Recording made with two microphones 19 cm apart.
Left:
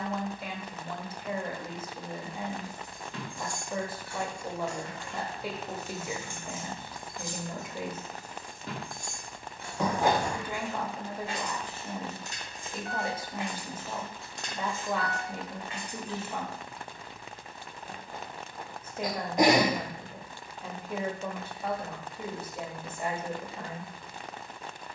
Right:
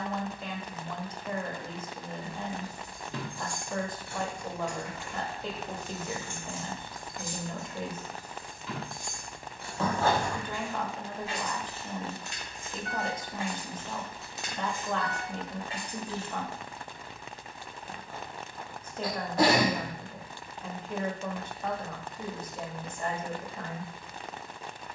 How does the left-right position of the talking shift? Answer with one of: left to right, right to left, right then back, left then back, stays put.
stays put.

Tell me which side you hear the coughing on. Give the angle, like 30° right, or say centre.
10° left.